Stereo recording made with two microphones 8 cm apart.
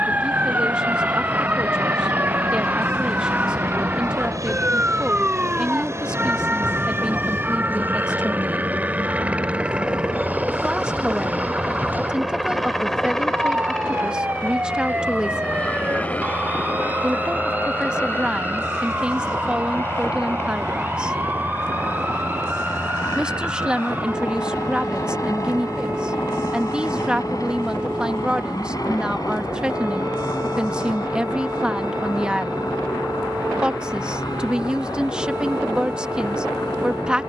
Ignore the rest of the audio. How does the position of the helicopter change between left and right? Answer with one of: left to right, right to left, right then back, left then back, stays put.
right to left.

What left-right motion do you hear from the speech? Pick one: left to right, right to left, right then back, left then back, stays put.
stays put.